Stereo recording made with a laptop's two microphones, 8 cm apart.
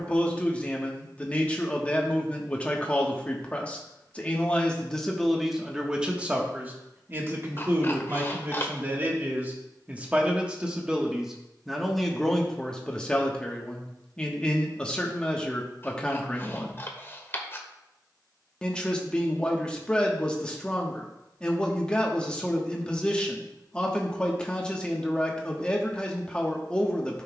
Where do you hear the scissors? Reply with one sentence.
In this clip you hear the scissors on the left.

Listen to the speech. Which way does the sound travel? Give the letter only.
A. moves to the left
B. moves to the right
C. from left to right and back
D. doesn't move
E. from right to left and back
C.